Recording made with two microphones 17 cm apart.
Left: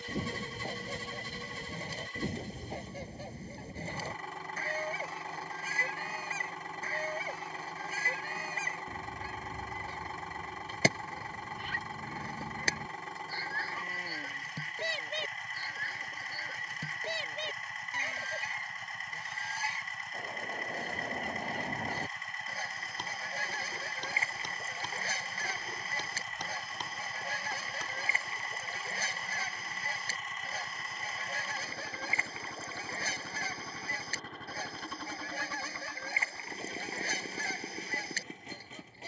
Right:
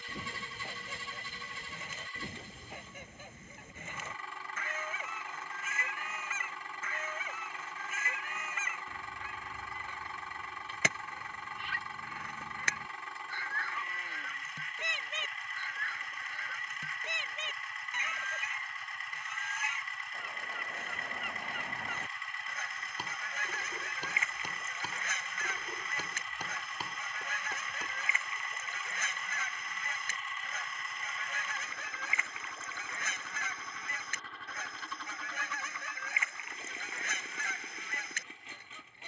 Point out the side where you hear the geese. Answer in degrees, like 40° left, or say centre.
30° left.